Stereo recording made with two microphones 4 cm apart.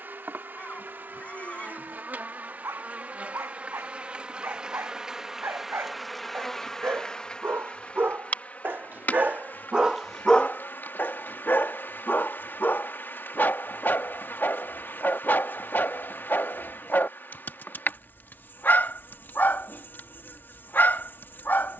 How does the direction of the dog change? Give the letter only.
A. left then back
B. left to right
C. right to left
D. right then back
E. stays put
C.